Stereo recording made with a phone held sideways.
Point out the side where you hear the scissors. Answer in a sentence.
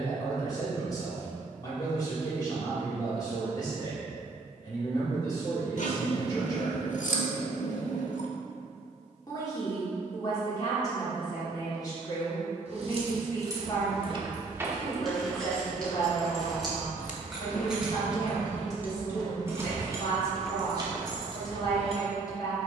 You can hear the scissors on the left.